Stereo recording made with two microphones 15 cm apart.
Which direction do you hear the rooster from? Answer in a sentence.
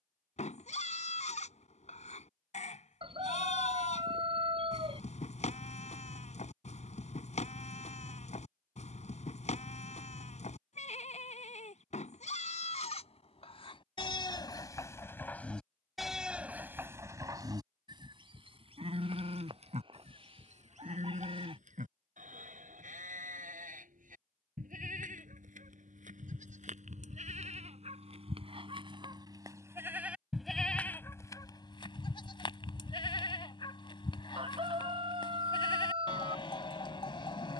In this clip you hear the rooster on the right.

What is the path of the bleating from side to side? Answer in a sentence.
You can hear the bleating go right and come back.